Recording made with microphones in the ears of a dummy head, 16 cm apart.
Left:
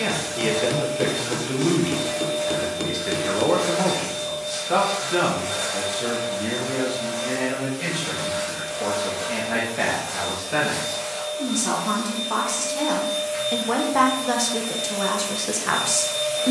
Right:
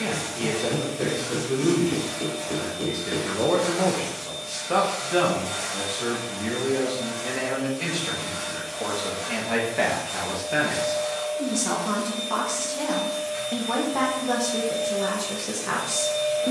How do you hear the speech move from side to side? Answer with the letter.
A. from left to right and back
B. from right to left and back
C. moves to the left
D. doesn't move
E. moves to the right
A.